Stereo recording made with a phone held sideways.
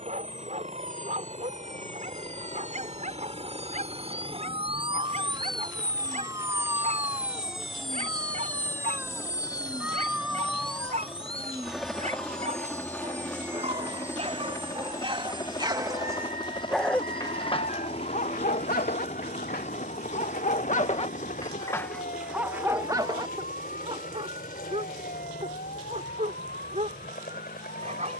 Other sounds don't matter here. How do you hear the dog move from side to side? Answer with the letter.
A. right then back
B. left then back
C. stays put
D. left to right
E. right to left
B.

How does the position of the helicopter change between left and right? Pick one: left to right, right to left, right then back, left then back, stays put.
right to left.